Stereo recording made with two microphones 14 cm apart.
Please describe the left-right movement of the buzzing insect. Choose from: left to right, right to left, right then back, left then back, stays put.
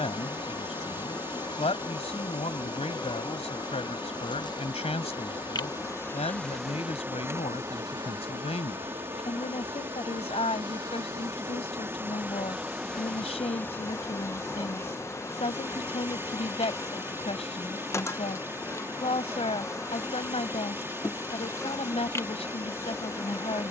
right then back.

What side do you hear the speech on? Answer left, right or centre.
left.